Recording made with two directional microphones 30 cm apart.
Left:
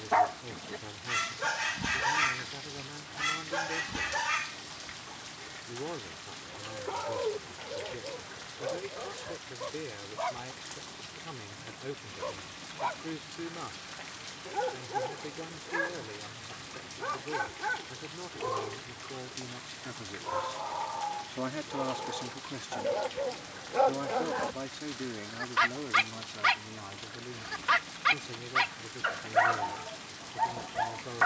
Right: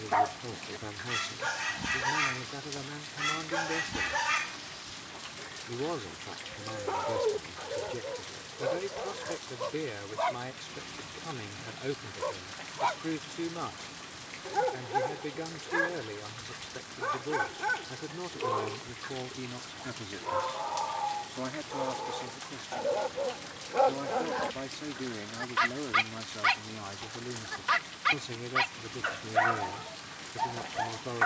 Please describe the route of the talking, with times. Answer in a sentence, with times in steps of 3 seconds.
You can hear the talking on the right from 0 s, on the left from 21 s, in the centre from 24 s and on the right from 27 s.